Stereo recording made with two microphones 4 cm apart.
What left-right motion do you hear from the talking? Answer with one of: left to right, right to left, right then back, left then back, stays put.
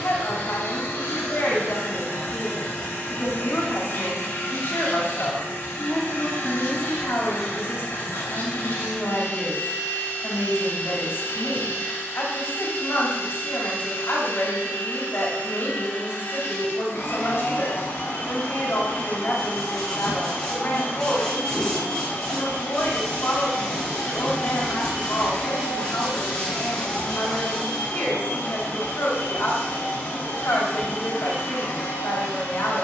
stays put.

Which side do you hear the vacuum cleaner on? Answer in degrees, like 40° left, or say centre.
60° left.